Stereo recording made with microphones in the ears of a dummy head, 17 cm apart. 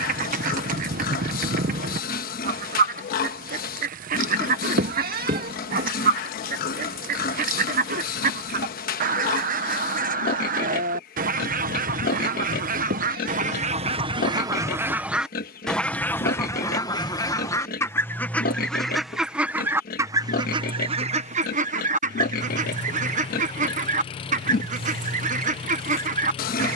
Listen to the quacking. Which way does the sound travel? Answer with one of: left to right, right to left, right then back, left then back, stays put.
left then back.